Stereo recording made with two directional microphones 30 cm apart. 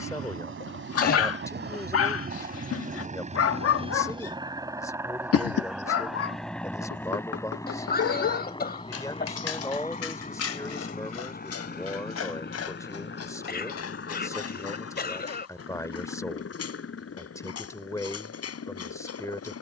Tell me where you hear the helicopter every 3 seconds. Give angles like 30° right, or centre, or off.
40° right, 10° right, 10° left, 30° left, 40° left, 40° left, 50° left.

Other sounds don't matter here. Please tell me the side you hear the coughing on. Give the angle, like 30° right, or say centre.
30° left.